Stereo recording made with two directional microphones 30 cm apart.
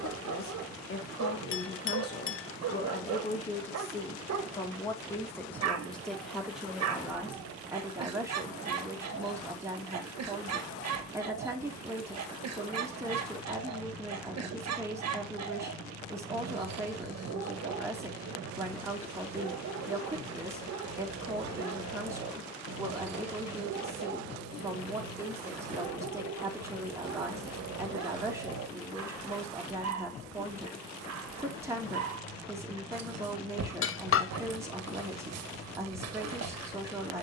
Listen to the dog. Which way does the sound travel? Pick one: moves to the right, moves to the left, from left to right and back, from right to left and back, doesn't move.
doesn't move.